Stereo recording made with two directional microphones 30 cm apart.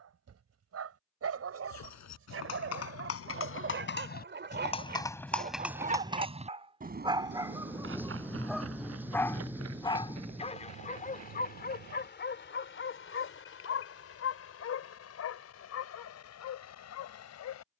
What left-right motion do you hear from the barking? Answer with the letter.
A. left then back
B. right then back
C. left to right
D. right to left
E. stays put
D.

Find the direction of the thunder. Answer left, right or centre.
centre.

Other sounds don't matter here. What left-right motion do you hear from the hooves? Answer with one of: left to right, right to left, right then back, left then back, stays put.
left to right.